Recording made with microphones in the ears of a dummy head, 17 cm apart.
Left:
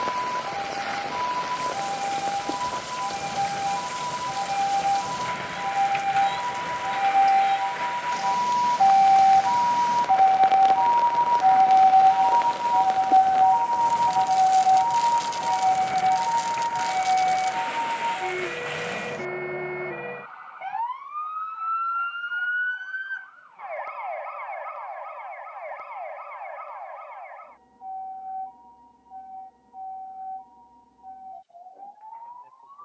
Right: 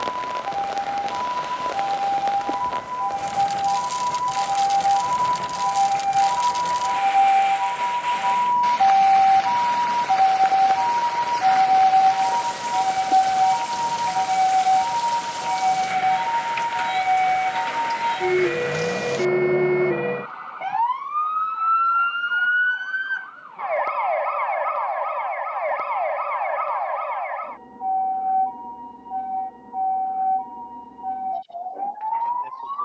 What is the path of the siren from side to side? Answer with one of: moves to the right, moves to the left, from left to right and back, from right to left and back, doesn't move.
moves to the right.